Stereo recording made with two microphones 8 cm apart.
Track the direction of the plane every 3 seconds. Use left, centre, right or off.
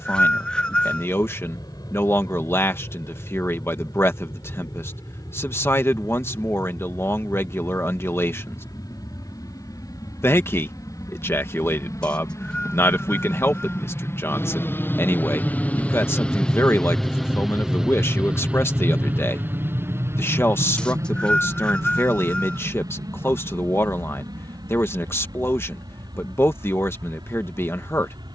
left, left, left, left, left, centre, right, right, right, right.